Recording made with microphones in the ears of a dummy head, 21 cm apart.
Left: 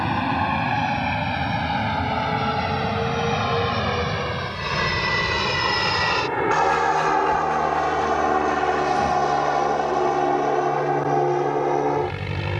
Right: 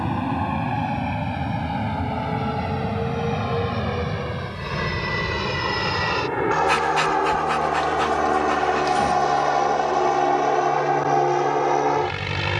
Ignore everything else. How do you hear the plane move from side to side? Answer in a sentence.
You can hear the plane move to the right.